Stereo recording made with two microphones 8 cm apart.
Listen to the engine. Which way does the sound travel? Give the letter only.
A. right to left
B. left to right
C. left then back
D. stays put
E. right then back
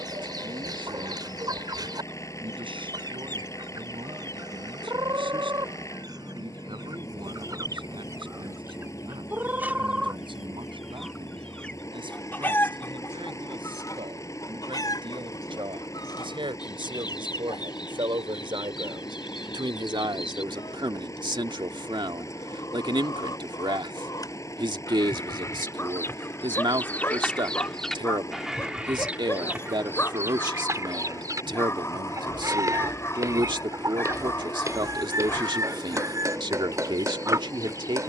D.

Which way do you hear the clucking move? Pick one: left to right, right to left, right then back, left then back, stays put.
left then back.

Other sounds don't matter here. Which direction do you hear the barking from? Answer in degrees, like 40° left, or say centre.
30° left.